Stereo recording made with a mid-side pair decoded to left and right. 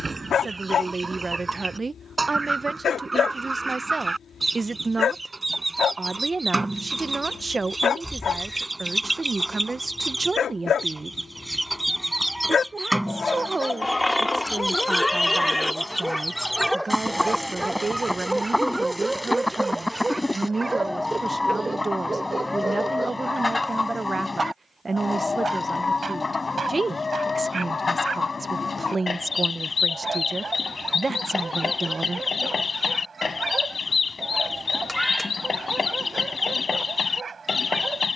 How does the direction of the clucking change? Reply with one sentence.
In this clip you hear the clucking move to the left.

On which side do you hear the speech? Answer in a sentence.
In this clip you hear the speech on the right.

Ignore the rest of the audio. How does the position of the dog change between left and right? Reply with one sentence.
In this clip you hear the dog move from left to right.